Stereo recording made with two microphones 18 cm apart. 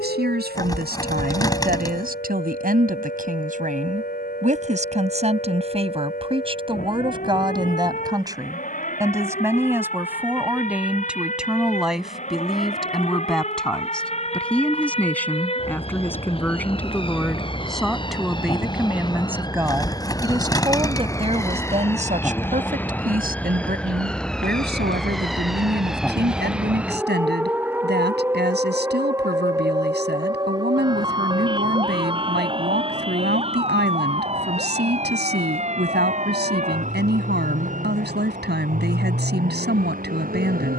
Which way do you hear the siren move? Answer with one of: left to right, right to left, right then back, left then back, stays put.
left to right.